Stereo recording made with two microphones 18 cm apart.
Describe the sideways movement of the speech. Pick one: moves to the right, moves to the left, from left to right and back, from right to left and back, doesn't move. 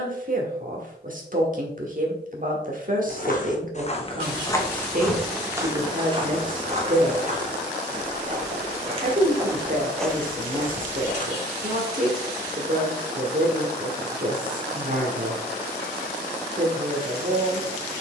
doesn't move.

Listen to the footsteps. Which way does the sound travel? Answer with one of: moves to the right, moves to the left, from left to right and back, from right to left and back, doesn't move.
from left to right and back.